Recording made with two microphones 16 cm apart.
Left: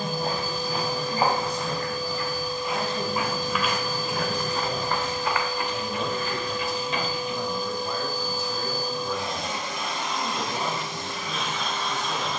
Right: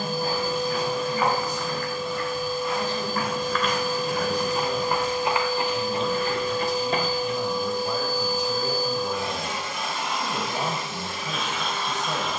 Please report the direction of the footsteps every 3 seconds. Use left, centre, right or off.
left, centre, right, off.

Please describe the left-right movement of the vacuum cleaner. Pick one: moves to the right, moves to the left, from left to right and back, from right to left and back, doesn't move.
doesn't move.